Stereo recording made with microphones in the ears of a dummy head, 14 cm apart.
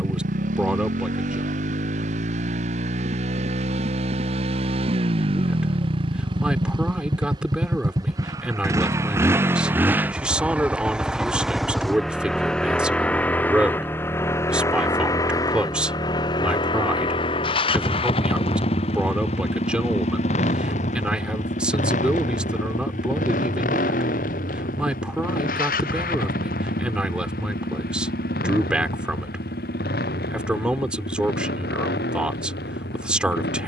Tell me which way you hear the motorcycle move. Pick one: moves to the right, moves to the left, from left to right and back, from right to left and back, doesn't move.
moves to the left.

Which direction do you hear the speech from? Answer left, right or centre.
centre.